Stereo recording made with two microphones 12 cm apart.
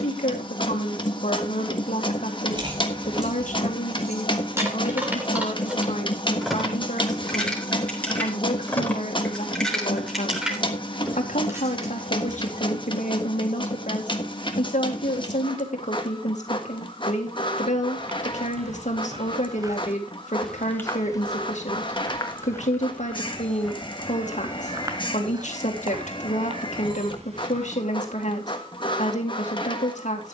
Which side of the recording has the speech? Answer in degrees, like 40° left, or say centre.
80° left.